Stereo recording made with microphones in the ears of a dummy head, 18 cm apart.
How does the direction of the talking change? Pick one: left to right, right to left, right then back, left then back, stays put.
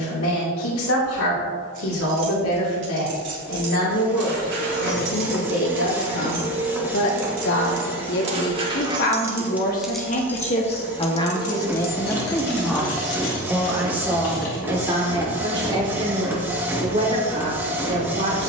left to right.